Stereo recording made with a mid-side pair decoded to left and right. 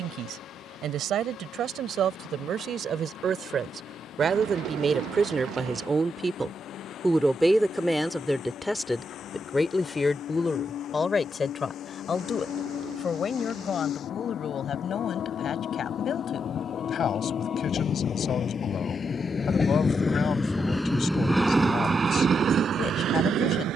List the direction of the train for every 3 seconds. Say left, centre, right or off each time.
left, left, left, left, left, left, left, right.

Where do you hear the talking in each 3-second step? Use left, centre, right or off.
right, right, centre, left, left, left, left, left.